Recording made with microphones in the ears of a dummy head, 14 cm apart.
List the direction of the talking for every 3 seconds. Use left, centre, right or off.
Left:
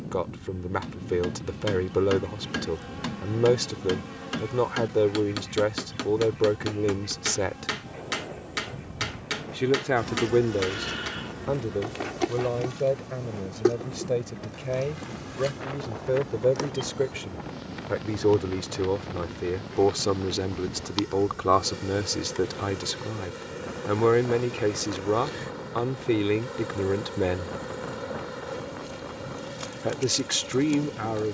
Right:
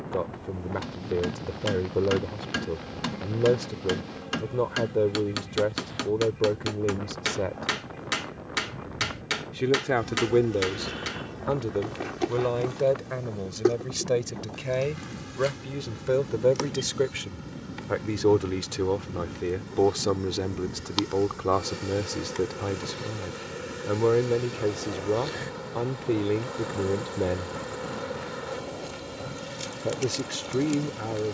left, left, left, centre, right, right, centre, left, left, left, left.